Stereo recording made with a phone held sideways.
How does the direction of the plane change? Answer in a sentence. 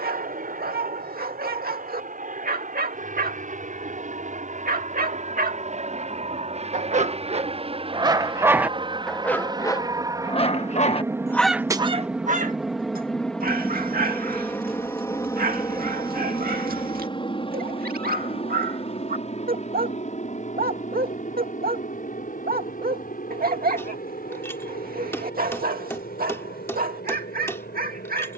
In this clip you hear the plane move to the left.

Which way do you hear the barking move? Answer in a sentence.
You can hear the barking move from right to left and back again.